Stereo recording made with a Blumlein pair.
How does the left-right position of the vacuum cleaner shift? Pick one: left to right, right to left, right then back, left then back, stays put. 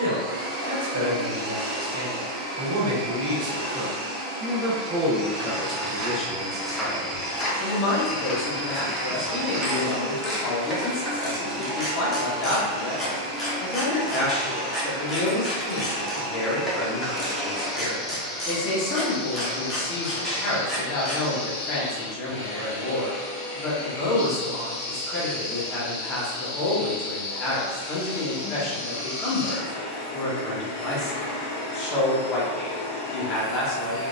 right to left.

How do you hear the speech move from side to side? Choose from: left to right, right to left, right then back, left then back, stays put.
right to left.